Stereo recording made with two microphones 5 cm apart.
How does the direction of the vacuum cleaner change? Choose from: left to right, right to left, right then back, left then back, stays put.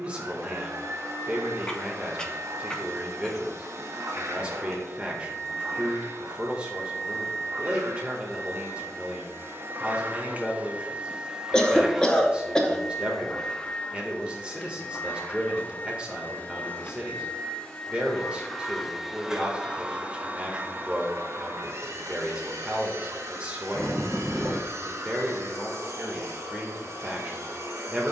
left then back.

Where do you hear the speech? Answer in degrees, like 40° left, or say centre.
20° right.